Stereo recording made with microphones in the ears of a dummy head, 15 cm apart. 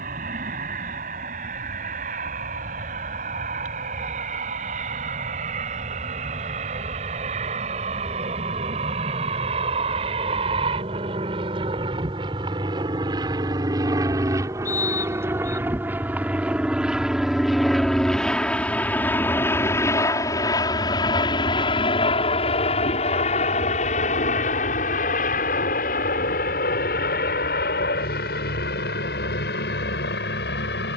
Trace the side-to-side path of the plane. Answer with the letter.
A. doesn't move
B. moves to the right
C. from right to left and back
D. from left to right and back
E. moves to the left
E.